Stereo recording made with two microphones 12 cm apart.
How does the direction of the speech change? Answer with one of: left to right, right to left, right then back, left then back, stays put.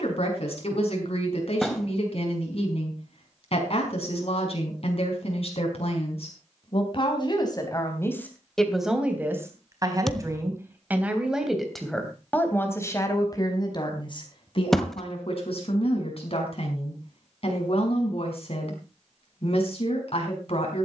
right then back.